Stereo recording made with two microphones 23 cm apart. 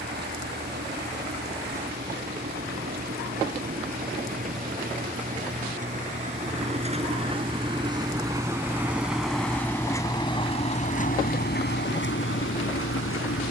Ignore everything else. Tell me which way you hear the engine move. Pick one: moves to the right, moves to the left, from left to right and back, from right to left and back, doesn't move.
moves to the left.